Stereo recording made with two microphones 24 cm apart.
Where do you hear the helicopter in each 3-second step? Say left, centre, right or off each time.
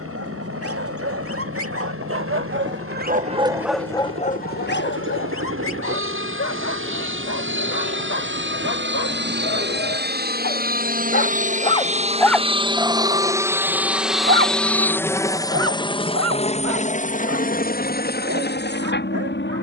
right, right, right, right, centre, left, left.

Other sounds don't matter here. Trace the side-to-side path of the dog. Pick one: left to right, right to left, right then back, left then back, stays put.
left then back.